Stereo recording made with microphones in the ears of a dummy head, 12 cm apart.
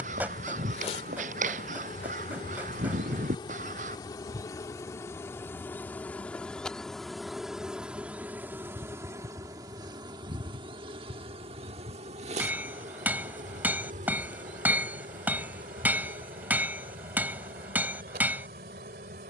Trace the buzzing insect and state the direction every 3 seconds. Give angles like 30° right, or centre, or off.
40° left, 20° left, centre, 30° right, 60° right, 70° right, 70° right.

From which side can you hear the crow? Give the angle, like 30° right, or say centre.
60° right.